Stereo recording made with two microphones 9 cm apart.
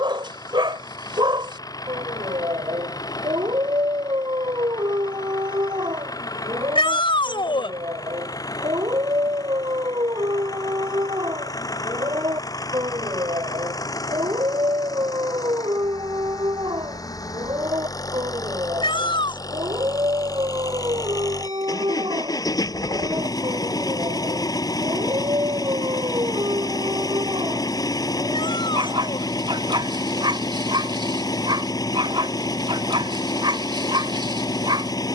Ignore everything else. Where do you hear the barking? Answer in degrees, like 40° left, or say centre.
60° right.